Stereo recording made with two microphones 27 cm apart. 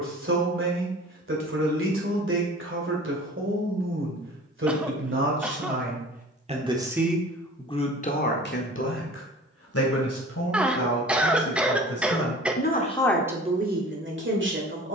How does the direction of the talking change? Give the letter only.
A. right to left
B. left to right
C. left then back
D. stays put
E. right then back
C.